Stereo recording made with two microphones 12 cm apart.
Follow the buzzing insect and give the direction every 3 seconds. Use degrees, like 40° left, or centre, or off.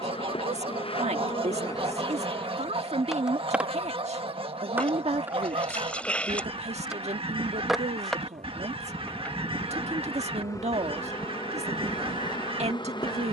30° left, 10° right, centre, 30° left, 40° left.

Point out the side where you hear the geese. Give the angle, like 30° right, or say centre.
50° right.